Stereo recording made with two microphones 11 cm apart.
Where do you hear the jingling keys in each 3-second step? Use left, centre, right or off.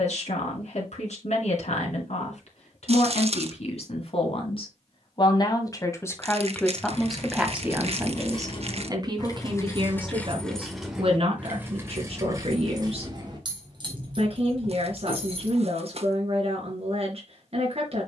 off, off, left, centre, right, right.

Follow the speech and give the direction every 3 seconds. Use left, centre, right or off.
left, left, centre, right, right, right.